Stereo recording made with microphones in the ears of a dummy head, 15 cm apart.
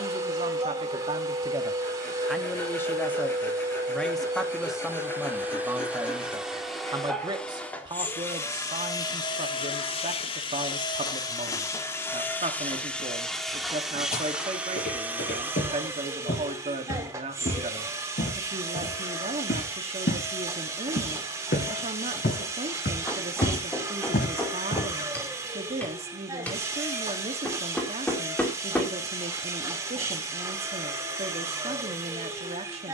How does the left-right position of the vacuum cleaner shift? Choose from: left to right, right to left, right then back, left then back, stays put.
left then back.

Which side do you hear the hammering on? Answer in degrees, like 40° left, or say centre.
10° left.